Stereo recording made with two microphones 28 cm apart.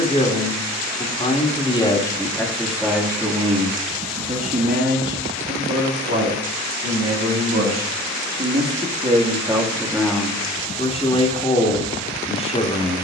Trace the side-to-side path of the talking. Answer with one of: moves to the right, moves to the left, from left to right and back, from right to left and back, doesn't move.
from left to right and back.